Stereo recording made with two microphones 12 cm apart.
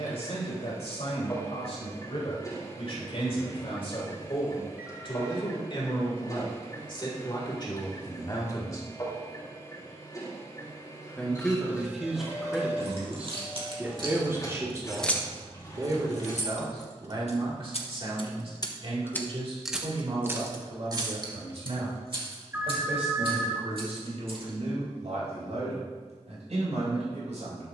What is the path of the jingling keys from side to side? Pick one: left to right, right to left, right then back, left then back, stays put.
left then back.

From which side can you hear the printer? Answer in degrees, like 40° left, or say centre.
30° left.